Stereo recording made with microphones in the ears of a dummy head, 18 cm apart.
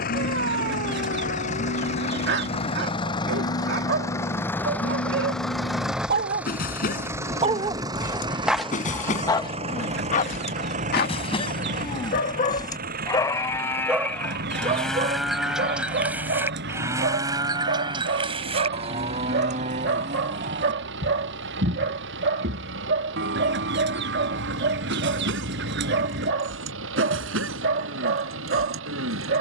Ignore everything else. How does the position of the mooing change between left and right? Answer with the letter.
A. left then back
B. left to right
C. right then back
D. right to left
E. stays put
B.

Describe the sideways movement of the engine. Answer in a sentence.
You can hear the engine travel towards the right.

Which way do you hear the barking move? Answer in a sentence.
In this clip you hear the barking move from right to left and back again.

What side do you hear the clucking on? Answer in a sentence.
In this clip you hear the clucking on the right.